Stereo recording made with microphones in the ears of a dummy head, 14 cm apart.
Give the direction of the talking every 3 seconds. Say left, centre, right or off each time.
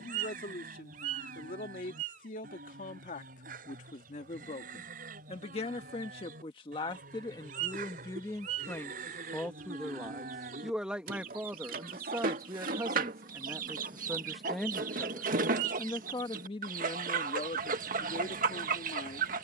left, left, left, centre, centre, left, left.